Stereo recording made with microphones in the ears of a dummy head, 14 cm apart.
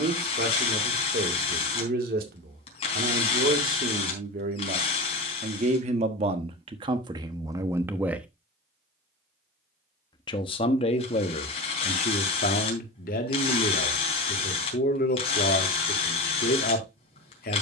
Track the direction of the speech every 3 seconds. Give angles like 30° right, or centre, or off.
60° right, 50° right, 30° right, 40° left, 50° left, 60° left.